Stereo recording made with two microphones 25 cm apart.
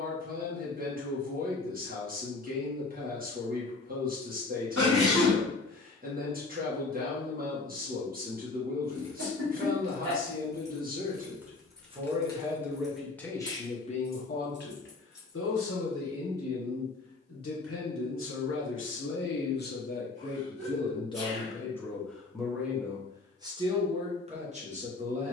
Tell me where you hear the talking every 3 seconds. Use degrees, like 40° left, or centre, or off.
40° right, 40° right, 40° right, 30° right, 10° left, 60° left, 40° left, centre, 30° right.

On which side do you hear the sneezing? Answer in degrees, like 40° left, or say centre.
70° right.